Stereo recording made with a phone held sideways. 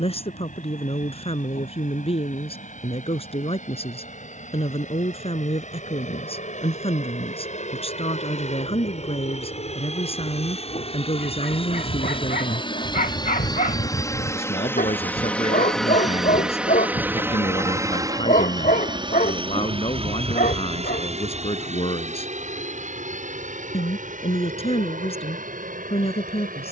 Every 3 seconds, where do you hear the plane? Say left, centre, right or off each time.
left, left, left, left, left, centre, right, right, right.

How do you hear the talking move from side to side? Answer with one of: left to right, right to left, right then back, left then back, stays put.
stays put.